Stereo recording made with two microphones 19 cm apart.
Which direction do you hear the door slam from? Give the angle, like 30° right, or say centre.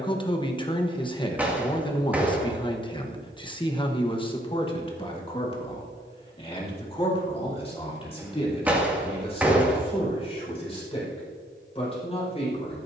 10° right.